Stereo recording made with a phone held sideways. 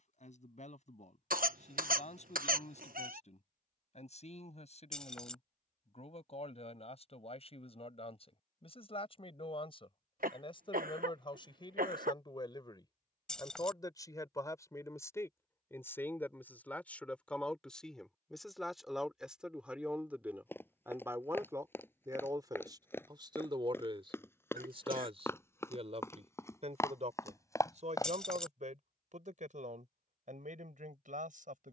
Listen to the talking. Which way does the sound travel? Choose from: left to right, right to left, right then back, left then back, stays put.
left to right.